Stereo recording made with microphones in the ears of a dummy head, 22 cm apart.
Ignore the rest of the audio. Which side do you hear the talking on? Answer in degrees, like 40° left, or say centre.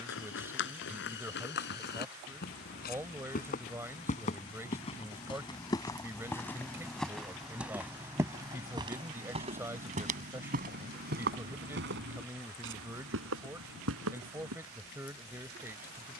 10° right.